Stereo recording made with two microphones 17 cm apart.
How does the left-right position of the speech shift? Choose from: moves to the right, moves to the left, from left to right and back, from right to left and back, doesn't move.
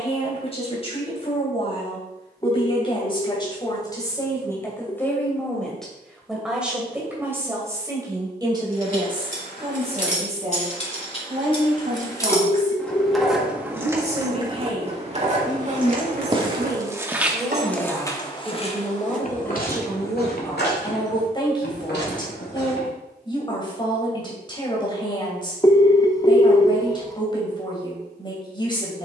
from left to right and back.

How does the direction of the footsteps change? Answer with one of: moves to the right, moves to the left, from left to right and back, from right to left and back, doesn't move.
moves to the left.